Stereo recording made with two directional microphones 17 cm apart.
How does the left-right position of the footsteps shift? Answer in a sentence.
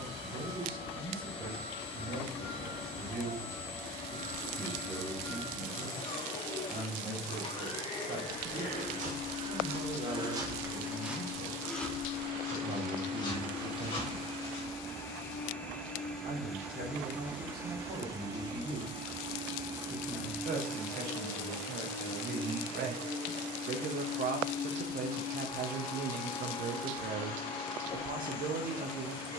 You can hear the footsteps move to the left.